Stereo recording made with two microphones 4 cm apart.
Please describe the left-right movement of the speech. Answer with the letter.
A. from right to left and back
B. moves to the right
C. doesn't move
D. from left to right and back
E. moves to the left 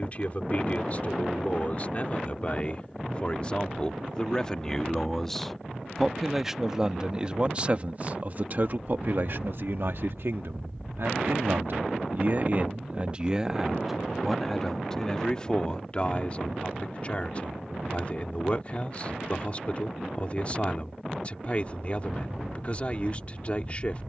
D.